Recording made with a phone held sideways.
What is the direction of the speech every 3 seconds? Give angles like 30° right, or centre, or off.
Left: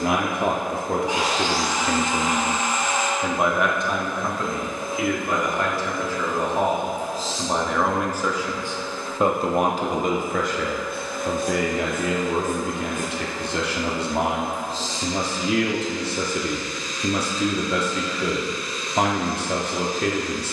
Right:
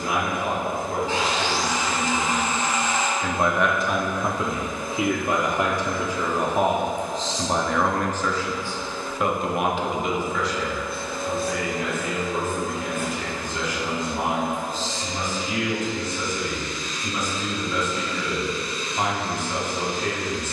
70° left, 10° right, centre, 50° left, 80° left, 80° left, 80° left.